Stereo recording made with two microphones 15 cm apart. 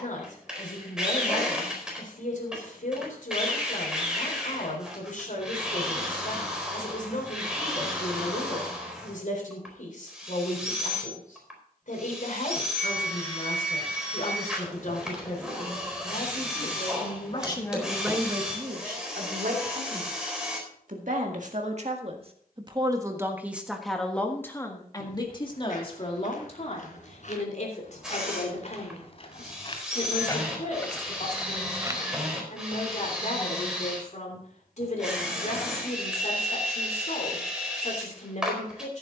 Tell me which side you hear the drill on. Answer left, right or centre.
centre.